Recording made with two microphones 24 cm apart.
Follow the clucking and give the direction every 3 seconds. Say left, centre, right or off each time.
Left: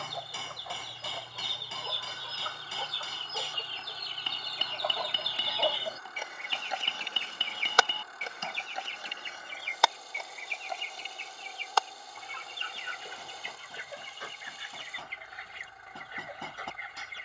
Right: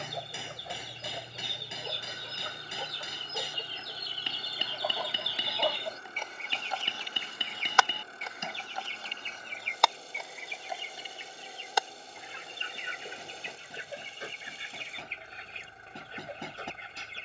right, centre, left, centre, right, right.